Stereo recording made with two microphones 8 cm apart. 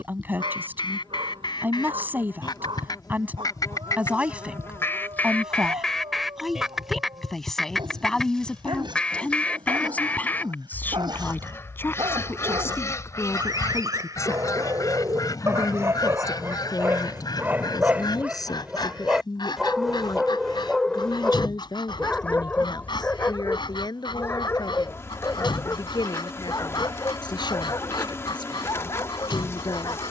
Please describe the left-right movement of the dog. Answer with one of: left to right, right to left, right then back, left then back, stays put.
right to left.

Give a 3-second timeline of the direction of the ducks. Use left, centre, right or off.
left, left, centre, left, left, left, left, left, left, left.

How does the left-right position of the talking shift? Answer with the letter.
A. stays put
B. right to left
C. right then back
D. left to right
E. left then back
B.